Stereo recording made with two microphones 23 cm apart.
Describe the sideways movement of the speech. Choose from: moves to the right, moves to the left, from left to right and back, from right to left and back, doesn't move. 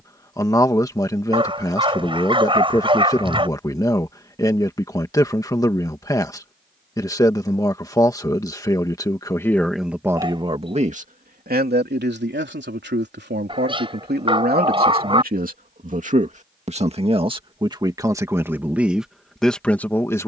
from left to right and back.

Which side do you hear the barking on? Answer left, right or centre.
right.